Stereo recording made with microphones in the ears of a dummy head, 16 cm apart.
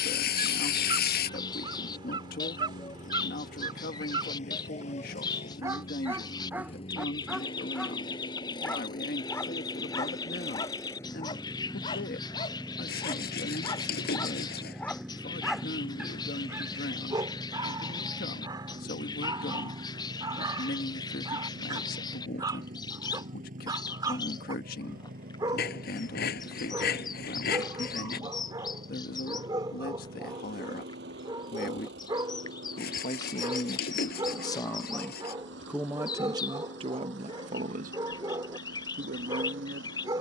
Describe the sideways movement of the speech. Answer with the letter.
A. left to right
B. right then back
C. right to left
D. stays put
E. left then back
A.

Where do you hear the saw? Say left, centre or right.
left.